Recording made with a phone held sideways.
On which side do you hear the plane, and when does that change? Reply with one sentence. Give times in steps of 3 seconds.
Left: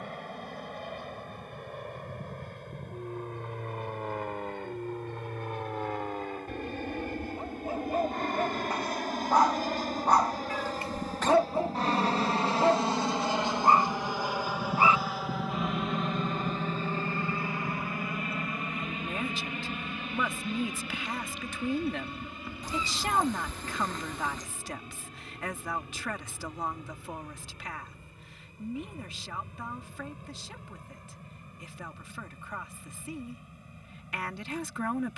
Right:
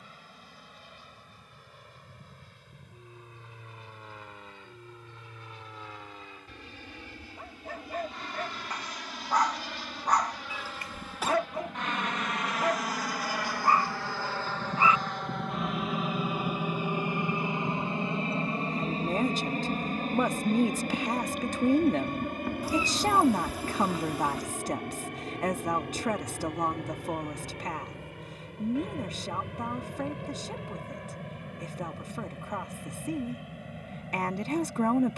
You can hear the plane on the left from 0 s, in the centre from 15 s and on the right from 18 s.